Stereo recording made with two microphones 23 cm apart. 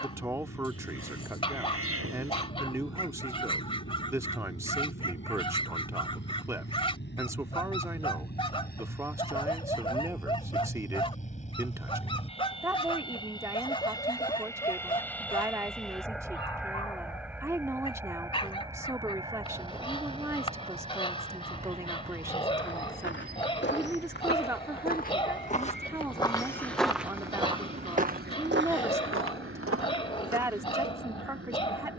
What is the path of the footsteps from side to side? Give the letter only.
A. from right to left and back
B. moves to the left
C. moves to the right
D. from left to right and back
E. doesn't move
C.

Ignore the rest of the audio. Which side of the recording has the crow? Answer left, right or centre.
right.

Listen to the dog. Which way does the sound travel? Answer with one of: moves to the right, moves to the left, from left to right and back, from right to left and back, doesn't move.
doesn't move.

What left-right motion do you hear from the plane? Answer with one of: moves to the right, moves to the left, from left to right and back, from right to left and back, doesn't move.
moves to the right.